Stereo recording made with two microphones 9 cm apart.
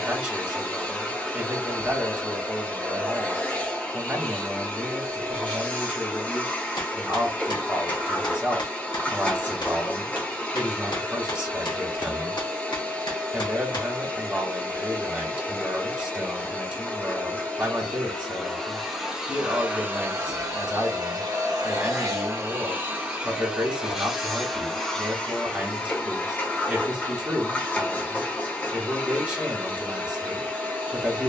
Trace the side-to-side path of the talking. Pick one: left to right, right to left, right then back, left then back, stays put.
stays put.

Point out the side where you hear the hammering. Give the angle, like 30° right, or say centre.
50° left.